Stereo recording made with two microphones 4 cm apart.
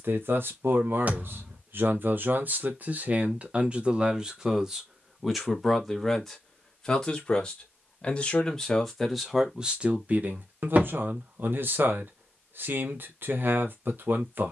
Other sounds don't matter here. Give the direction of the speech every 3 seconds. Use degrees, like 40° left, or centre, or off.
50° right, 10° right, 10° left, 30° right, 50° right.